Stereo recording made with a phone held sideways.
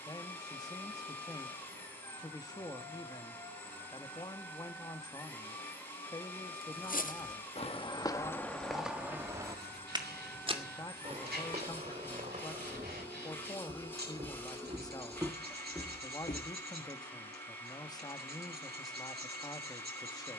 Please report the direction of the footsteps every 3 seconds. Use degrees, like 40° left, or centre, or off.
off, off, 30° left, 30° right, 40° right, 20° left, off.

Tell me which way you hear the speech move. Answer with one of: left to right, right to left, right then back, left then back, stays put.
stays put.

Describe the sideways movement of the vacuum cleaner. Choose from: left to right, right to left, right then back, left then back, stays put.
stays put.